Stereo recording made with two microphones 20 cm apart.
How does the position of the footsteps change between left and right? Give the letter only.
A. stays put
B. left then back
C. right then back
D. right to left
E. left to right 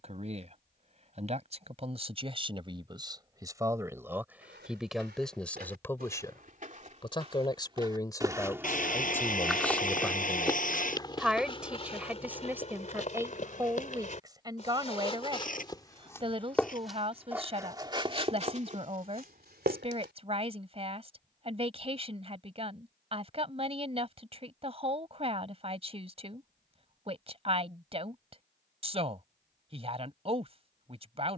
B.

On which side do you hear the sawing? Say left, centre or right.
left.